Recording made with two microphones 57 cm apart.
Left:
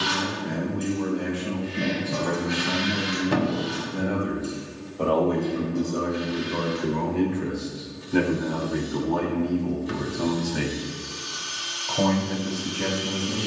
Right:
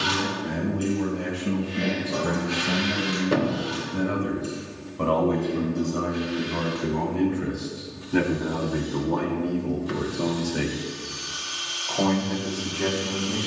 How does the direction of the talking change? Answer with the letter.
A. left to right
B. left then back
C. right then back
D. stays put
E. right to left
E.